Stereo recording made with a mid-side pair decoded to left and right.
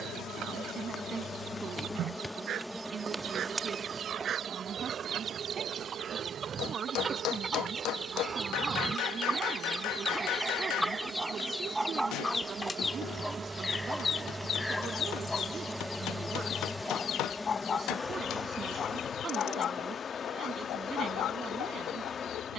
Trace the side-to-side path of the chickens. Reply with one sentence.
You can hear the chickens travel towards the left.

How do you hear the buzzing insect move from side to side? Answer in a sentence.
In this clip you hear the buzzing insect move from left to right and back again.